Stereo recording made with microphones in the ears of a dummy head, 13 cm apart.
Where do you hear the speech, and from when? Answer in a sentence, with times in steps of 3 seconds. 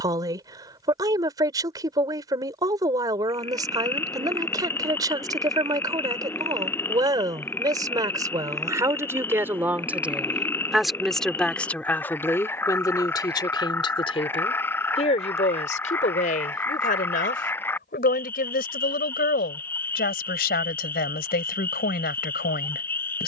In this clip you hear the speech on the right from 0 s, in the centre from 9 s and on the left from 12 s.